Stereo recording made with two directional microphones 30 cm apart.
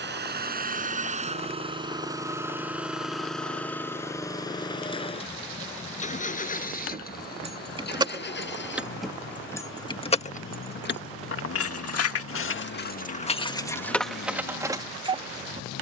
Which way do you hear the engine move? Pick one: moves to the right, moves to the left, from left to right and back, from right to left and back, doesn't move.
moves to the left.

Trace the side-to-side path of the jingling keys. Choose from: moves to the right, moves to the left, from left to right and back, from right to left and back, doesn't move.
from right to left and back.